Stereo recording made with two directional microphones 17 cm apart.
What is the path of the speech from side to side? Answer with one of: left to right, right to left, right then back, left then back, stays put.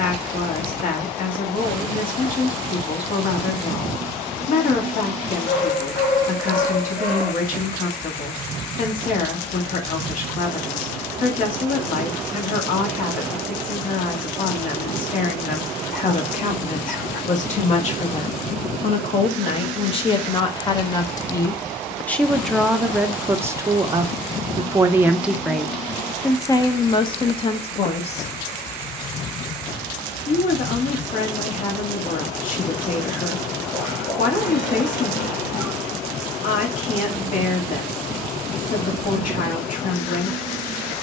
right then back.